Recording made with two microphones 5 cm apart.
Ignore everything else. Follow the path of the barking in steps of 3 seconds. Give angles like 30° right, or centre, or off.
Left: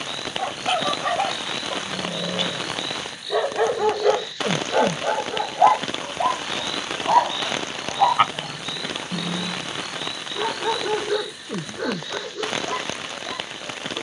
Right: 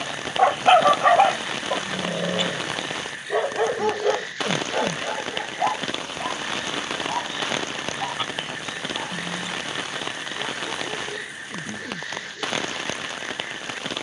20° right, 20° left, 50° left, 60° left, 60° left.